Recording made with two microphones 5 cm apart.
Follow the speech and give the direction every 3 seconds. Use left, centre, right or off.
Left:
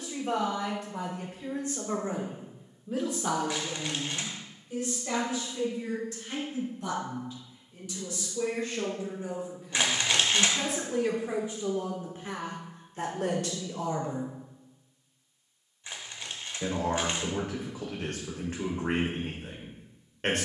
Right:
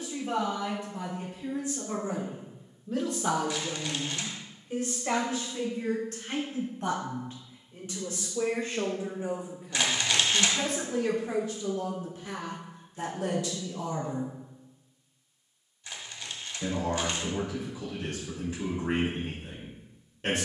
left, right, right, centre, left, left, left.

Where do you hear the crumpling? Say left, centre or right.
left.